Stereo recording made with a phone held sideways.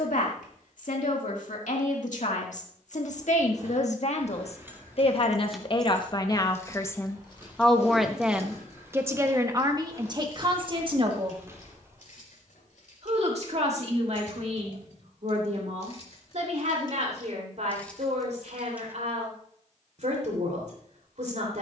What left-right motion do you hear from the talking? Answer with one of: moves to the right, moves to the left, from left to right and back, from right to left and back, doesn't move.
moves to the right.